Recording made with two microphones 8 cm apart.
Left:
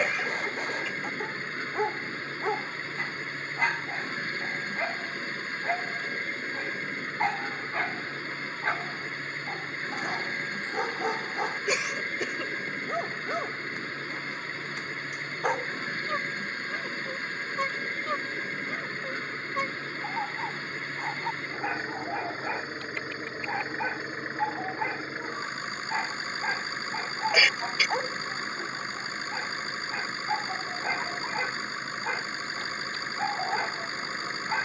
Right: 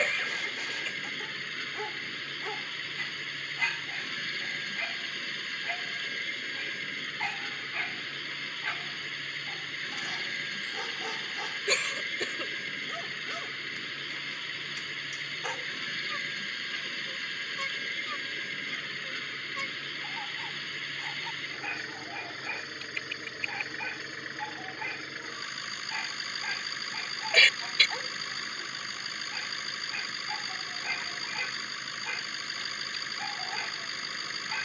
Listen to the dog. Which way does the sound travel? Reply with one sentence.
In this clip you hear the dog stay in one place.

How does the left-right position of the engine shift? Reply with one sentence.
In this clip you hear the engine stay put.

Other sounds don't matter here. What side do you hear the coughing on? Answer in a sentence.
You can hear the coughing in the centre.